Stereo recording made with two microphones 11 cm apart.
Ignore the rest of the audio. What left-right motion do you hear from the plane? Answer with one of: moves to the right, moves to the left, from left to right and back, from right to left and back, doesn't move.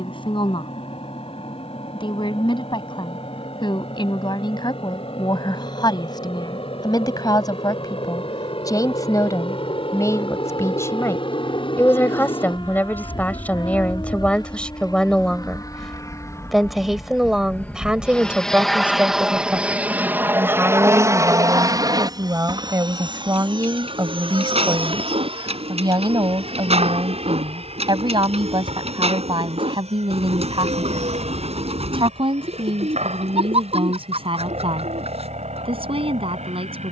moves to the right.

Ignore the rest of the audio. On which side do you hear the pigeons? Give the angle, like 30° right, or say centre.
70° right.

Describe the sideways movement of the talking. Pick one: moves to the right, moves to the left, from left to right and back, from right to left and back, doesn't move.
moves to the right.